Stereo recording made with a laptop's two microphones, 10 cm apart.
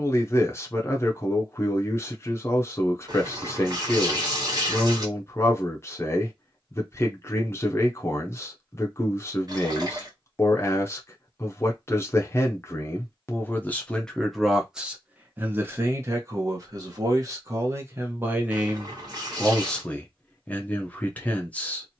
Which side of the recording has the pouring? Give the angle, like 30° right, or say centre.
40° right.